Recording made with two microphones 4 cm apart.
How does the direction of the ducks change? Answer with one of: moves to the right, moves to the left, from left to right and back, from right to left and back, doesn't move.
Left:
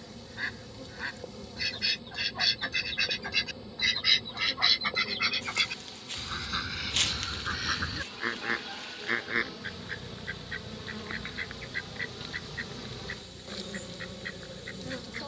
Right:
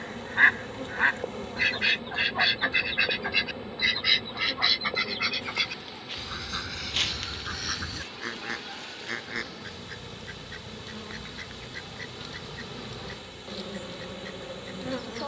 moves to the left.